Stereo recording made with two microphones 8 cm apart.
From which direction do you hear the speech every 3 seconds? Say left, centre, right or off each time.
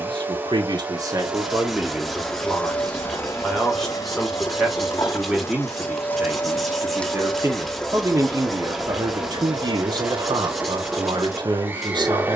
right, centre, right, right.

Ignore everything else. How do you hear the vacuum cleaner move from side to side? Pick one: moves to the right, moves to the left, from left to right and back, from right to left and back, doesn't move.
from right to left and back.